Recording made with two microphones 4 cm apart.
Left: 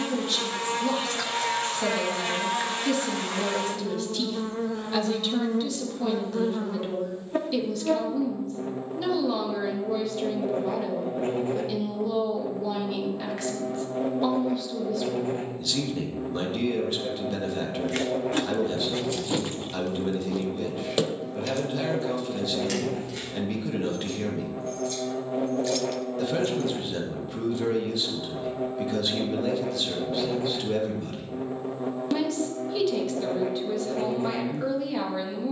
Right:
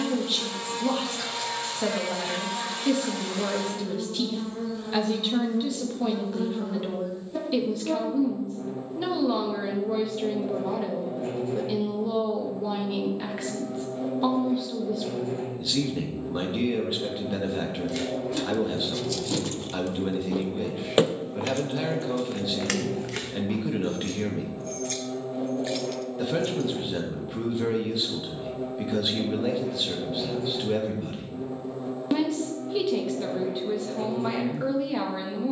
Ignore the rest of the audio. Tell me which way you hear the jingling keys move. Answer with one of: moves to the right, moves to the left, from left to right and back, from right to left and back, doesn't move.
from left to right and back.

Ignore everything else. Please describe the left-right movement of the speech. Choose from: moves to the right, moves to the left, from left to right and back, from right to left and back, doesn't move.
doesn't move.